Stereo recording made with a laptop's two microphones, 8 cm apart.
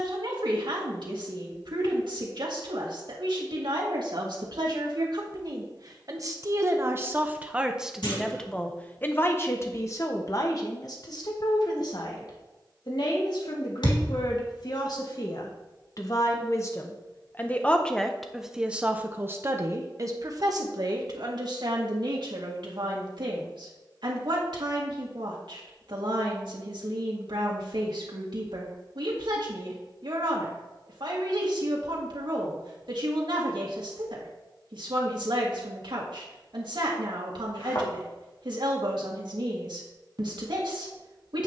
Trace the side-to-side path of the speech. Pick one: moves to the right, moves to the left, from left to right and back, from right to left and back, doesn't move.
from right to left and back.